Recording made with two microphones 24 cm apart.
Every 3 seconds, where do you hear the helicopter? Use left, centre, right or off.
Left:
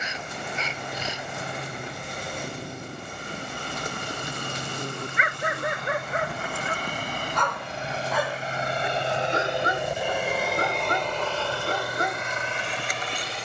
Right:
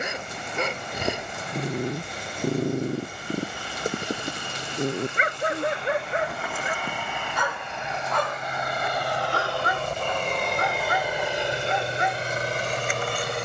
left, left, left, centre, right.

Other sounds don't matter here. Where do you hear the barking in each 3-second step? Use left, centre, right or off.
right, right, centre, left, left.